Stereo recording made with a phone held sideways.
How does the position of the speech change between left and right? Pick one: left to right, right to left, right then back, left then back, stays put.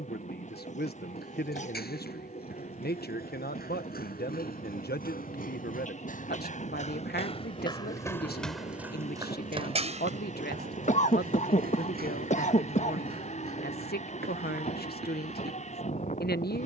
stays put.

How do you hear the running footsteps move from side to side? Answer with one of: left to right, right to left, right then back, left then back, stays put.
left to right.